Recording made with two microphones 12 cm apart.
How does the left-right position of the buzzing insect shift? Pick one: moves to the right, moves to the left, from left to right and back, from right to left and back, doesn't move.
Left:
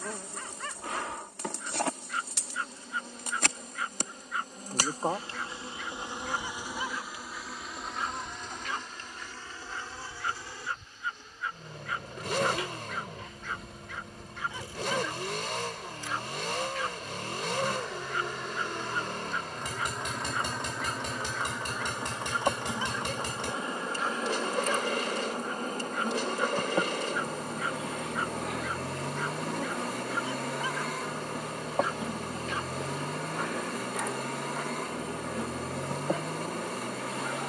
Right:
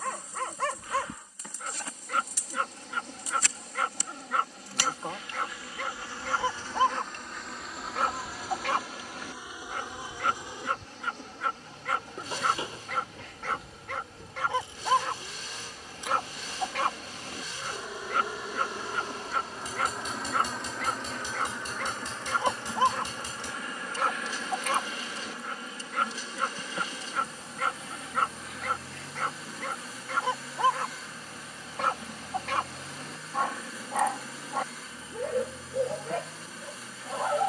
from left to right and back.